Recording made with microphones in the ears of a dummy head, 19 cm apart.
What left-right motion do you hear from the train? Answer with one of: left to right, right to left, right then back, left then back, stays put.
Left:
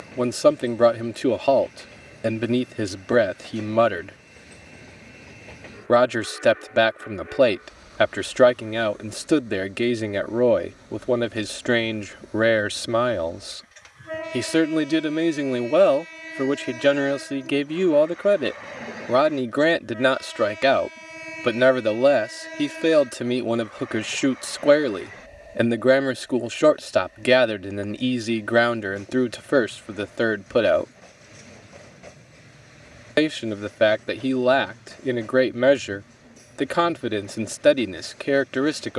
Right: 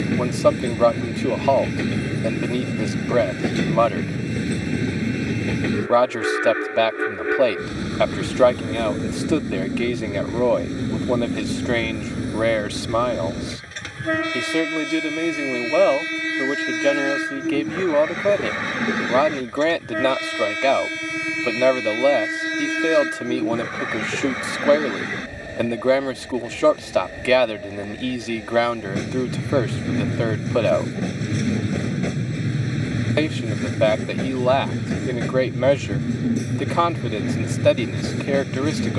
stays put.